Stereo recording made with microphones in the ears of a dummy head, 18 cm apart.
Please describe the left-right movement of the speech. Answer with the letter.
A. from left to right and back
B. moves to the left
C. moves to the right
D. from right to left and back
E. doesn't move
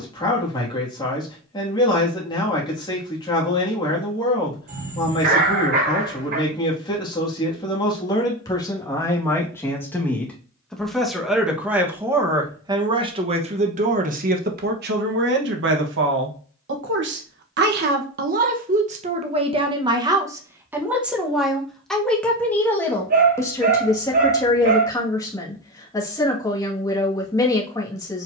A.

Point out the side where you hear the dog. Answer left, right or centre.
right.